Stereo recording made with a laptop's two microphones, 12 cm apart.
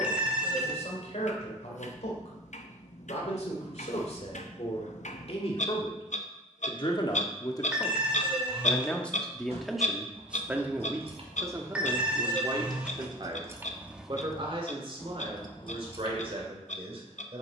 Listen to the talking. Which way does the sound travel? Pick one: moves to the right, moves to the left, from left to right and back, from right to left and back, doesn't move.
moves to the right.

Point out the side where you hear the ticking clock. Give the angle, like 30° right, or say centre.
80° left.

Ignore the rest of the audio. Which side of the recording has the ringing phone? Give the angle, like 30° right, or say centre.
10° right.